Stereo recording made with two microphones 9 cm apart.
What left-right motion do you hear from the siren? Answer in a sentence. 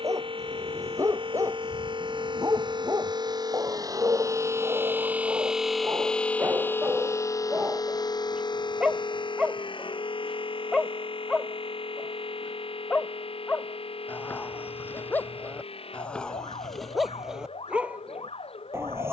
In this clip you hear the siren travel towards the left.